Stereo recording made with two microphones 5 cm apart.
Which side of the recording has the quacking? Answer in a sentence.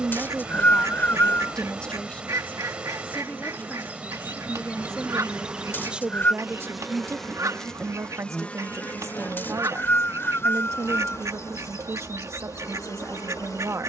In this clip you hear the quacking on the right.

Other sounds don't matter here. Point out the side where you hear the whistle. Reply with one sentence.
You can hear the whistle on the left.